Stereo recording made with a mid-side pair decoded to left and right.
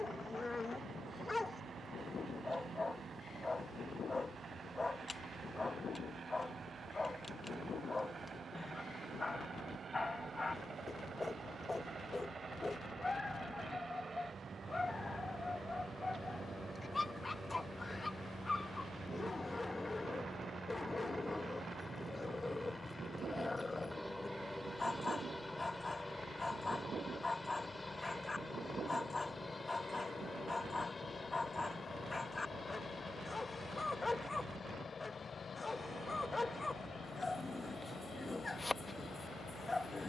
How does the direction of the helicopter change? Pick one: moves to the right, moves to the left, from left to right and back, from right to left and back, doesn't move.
moves to the left.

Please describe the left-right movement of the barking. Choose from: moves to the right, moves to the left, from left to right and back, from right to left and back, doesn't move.
doesn't move.